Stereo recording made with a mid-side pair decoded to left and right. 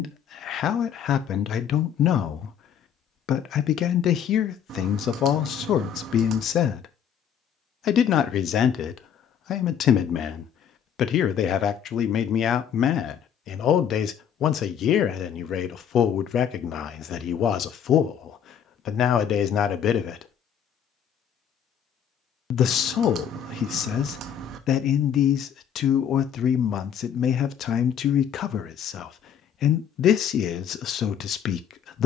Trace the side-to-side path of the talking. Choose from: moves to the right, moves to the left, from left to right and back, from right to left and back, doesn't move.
doesn't move.